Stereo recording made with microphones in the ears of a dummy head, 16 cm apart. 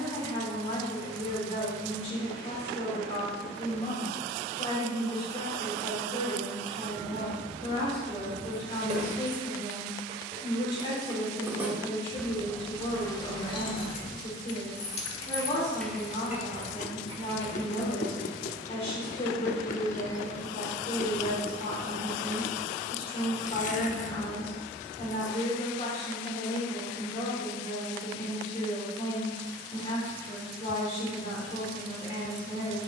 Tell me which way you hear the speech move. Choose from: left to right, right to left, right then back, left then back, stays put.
stays put.